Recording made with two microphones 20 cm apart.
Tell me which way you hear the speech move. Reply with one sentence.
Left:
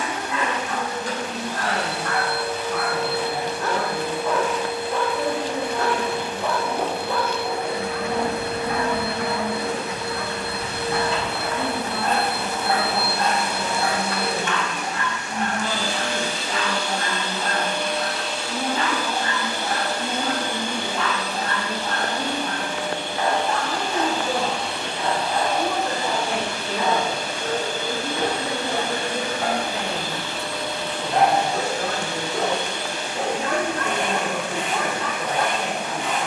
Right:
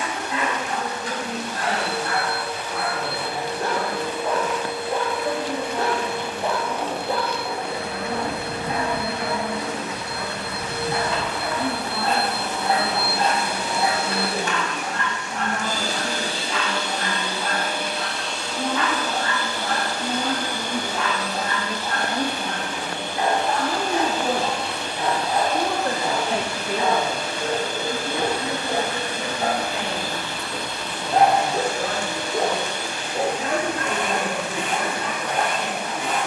In this clip you hear the speech go right and come back.